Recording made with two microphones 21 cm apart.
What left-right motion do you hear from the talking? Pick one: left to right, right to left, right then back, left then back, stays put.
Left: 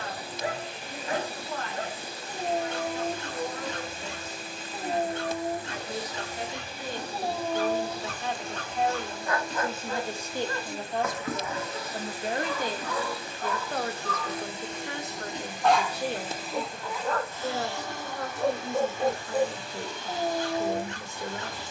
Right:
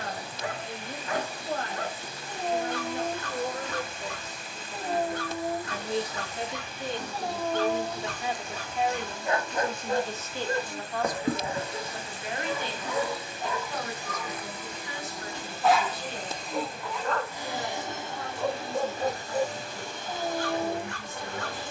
right to left.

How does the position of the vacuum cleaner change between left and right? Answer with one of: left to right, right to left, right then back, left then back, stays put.
left to right.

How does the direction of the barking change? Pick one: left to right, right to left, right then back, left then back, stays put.
right then back.